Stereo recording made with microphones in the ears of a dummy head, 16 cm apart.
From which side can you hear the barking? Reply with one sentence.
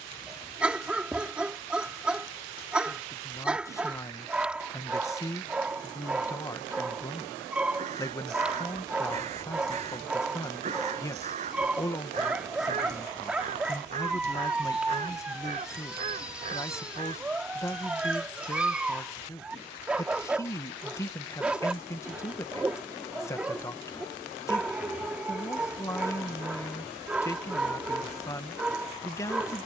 You can hear the barking in the centre.